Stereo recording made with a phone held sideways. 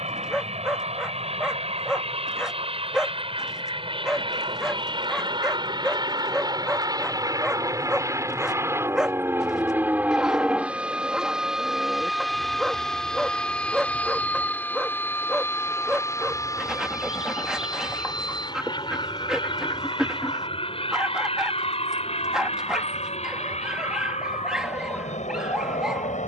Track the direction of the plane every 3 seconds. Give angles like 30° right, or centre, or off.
50° right, 40° right, 20° right, 10° right, 10° left, 20° left, 30° left, 40° left, 50° left.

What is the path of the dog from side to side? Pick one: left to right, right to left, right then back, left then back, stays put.
stays put.